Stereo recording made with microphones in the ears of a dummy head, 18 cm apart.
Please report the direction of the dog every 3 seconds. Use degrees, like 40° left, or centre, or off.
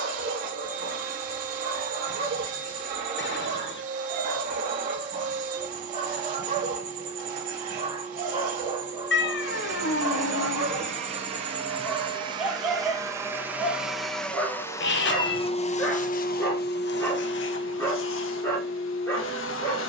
50° right, 40° right, 30° right, 20° right, centre, 10° left, 10° left.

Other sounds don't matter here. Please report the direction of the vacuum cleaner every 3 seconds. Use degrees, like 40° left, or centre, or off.
40° right, 40° right, 40° right, 30° right, 10° right, 50° left, 70° left.